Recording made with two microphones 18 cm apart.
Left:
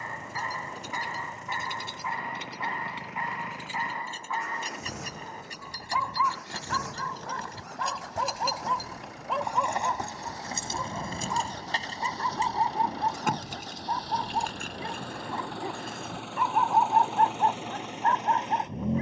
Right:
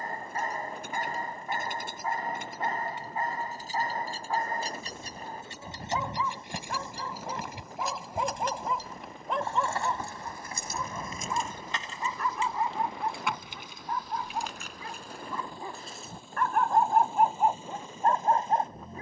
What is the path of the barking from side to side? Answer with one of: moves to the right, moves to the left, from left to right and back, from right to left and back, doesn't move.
from right to left and back.